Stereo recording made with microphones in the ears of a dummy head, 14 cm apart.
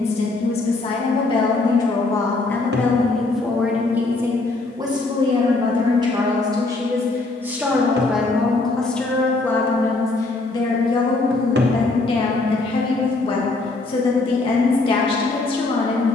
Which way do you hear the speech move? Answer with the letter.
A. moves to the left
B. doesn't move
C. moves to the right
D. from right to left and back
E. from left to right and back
E.